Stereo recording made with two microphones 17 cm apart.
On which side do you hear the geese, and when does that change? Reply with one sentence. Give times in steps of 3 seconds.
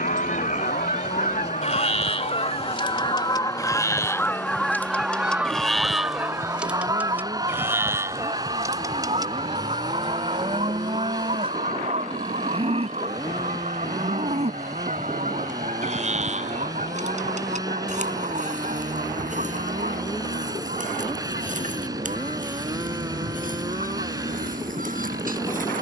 In this clip you hear the geese on the left from 0 s, in the centre from 3 s and on the right from 6 s.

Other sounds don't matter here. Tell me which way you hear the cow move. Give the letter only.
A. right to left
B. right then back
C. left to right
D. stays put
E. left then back
C.